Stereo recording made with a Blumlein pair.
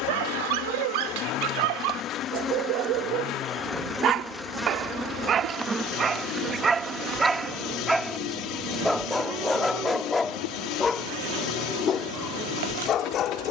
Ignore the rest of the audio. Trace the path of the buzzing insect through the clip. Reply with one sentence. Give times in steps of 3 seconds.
You can hear the buzzing insect on the left from 0 s, in the centre from 3 s and on the right from 6 s.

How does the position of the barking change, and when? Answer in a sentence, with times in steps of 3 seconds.
You can hear the barking on the right from 0 s, in the centre from 6 s and on the left from 12 s.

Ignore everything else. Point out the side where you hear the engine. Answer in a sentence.
You can hear the engine on the left.